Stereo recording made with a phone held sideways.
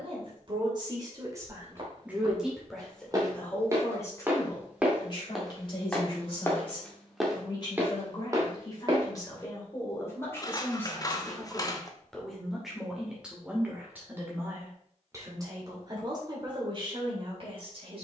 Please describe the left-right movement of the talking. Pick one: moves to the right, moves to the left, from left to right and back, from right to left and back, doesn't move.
from right to left and back.